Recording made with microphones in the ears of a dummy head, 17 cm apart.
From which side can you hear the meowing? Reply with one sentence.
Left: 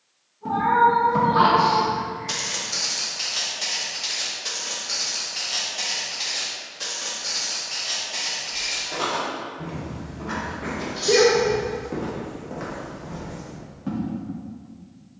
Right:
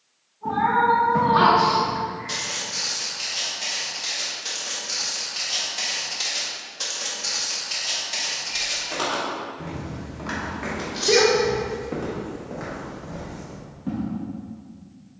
In this clip you hear the meowing on the right.